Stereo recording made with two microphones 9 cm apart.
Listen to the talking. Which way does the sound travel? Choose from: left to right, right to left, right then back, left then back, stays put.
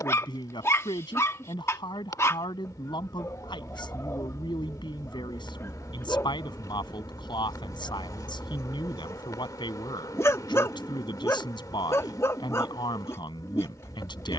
stays put.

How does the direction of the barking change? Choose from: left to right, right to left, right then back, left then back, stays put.
stays put.